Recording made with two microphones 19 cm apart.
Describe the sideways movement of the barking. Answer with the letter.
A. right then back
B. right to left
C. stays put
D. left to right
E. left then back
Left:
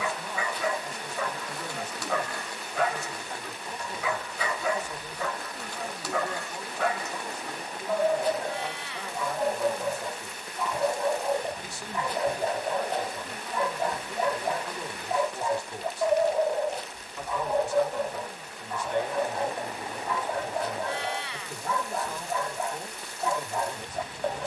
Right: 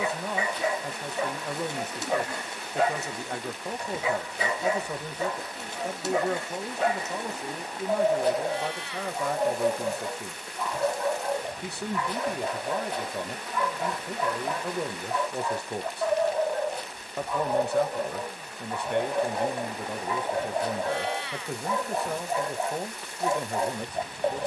E.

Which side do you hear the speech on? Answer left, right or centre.
right.